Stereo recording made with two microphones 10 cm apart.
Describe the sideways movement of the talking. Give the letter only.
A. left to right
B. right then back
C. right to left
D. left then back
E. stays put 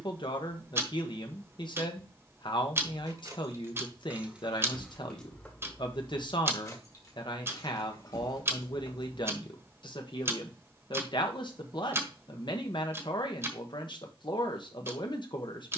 E.